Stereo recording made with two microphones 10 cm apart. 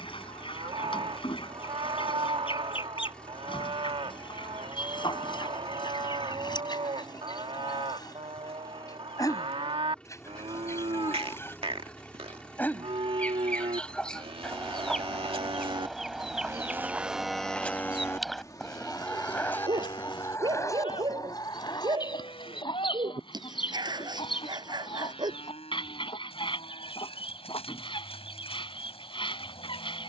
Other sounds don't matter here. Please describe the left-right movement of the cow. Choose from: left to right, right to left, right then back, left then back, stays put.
right to left.